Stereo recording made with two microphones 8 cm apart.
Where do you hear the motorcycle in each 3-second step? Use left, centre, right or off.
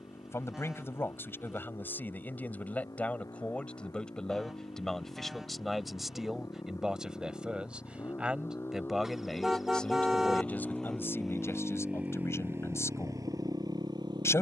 left, left, left, centre, right.